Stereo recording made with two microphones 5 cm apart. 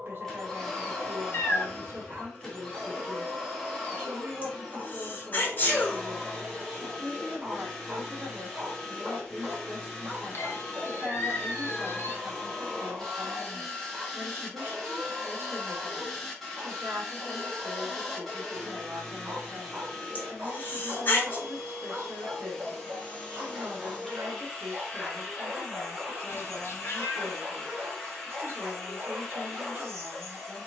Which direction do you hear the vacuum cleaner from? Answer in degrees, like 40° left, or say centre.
10° left.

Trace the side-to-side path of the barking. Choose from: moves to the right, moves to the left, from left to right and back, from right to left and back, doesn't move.
doesn't move.